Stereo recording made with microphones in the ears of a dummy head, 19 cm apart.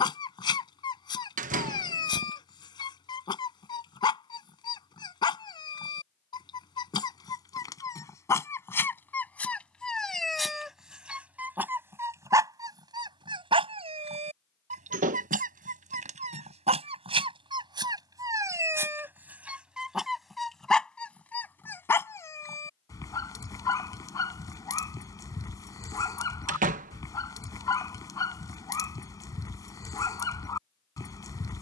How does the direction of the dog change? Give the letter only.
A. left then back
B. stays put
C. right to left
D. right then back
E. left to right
D.